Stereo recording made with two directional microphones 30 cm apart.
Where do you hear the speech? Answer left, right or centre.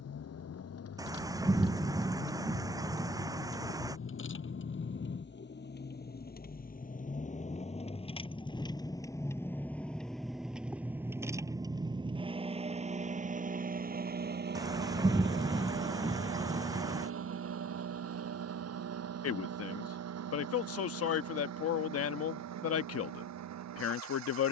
left.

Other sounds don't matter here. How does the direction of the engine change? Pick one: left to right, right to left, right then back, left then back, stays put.
left to right.